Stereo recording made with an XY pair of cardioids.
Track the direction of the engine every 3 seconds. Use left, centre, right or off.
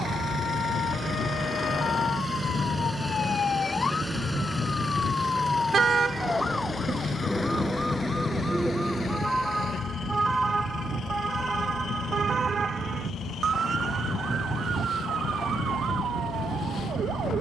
right, centre, left, left, left, left.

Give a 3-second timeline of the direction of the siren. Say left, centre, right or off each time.
left, left, centre, right, right, right.